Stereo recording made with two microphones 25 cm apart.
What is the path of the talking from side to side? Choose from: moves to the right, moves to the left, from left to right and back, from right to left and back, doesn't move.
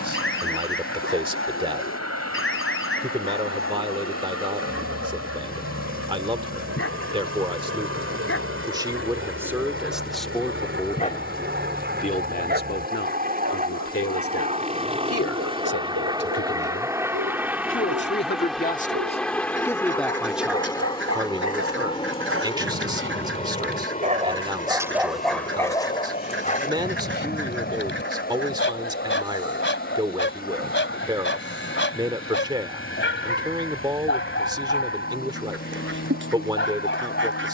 from right to left and back.